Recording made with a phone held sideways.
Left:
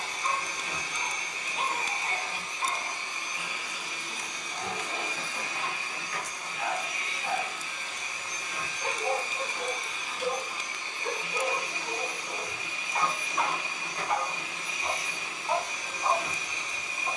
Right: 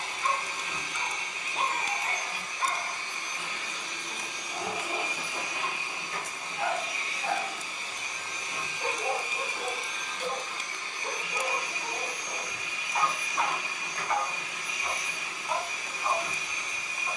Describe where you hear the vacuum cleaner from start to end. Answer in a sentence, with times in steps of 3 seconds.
You can hear the vacuum cleaner on the left from 0 s, in the centre from 3 s, on the right from 6 s, in the centre from 9 s and on the left from 12 s.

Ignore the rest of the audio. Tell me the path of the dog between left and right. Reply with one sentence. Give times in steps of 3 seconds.
In this clip you hear the dog on the right from 0 s, in the centre from 12 s and on the left from 15 s.